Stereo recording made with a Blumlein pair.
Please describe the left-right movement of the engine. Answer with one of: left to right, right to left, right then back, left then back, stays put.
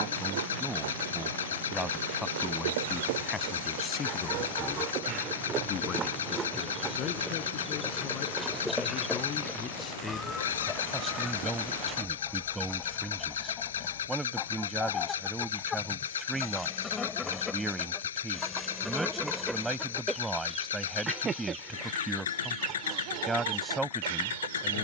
stays put.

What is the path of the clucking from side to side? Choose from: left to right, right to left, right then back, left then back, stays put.
left then back.